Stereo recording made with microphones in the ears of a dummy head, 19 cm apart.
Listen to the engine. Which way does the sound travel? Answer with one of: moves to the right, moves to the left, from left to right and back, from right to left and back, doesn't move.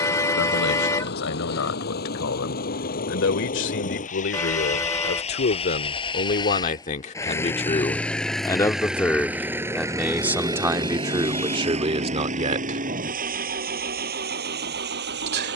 moves to the right.